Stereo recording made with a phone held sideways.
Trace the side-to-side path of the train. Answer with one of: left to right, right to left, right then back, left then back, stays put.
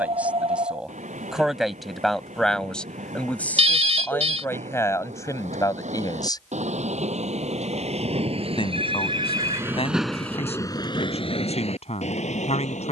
right to left.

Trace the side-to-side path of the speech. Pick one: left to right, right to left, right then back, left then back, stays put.
right to left.